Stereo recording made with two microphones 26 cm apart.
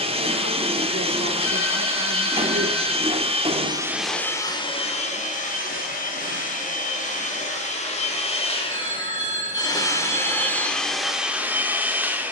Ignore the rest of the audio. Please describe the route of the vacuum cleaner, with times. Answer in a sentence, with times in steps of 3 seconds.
You can hear the vacuum cleaner on the right from 0 s, in the centre from 3 s, on the left from 6 s and in the centre from 9 s.